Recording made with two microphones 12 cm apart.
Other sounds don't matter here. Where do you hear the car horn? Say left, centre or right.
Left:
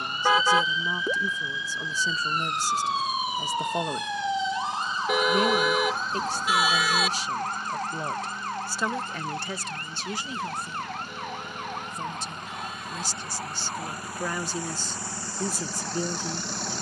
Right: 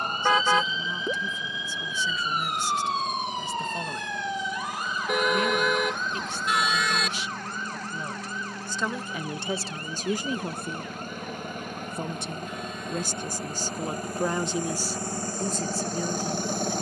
centre.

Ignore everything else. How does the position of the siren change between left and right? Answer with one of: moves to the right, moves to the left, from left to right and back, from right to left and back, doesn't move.
moves to the left.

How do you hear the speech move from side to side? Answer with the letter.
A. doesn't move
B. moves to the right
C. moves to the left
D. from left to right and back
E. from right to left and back
D.